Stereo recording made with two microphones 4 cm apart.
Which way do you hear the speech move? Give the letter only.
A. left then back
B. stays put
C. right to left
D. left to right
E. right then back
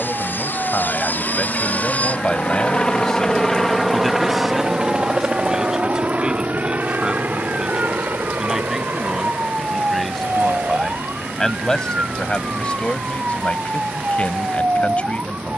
E.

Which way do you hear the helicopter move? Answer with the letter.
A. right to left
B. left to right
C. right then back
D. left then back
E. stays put
B.